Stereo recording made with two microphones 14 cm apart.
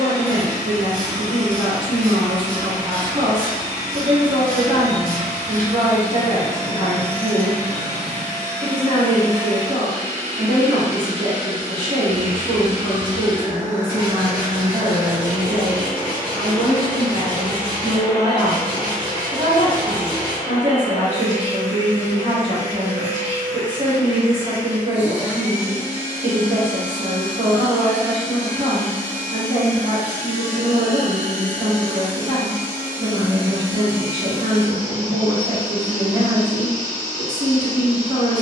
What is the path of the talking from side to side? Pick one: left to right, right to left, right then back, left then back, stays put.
stays put.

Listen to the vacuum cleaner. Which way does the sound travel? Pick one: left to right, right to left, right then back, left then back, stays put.
right to left.